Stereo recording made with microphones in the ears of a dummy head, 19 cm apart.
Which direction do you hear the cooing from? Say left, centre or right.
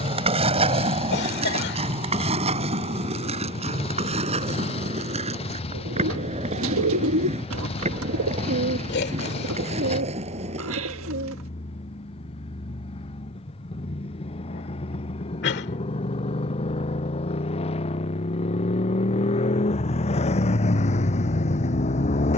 right.